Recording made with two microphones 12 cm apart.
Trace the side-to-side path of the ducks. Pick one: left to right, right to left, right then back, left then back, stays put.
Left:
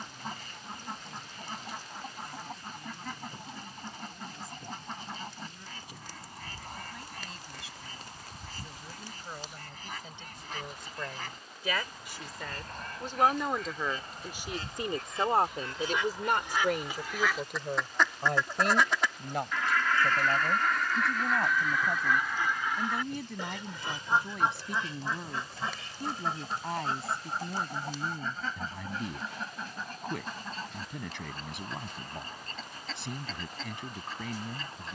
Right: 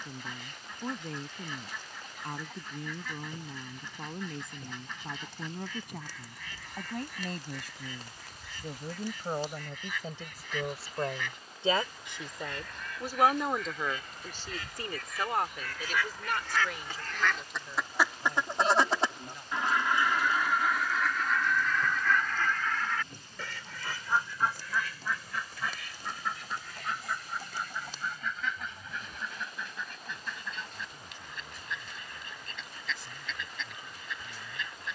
right then back.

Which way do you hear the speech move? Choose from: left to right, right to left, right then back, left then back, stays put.
right to left.